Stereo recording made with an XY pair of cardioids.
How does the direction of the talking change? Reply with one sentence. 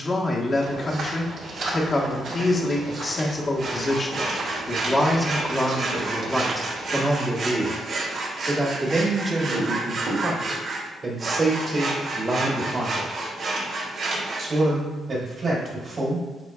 You can hear the talking travel towards the right.